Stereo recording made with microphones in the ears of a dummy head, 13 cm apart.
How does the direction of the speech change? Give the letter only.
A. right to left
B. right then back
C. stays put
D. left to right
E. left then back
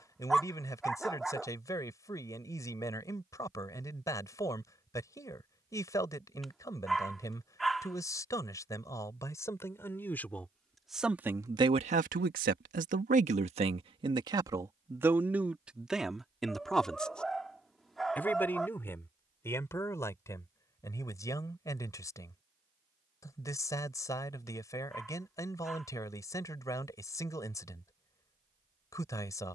B.